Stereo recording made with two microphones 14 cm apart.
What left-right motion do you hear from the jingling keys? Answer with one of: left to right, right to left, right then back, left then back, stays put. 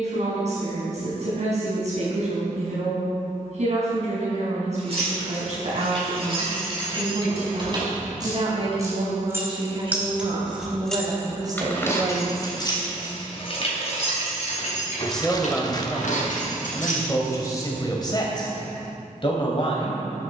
right to left.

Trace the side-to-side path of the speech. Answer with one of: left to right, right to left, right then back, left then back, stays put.
right to left.